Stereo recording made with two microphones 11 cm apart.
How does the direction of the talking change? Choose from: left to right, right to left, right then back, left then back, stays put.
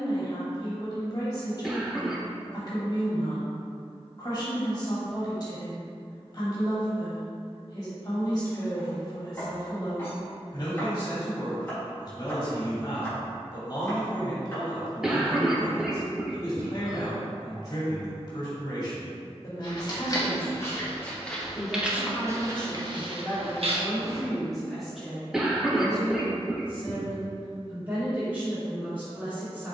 left to right.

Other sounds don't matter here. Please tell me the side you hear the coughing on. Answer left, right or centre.
centre.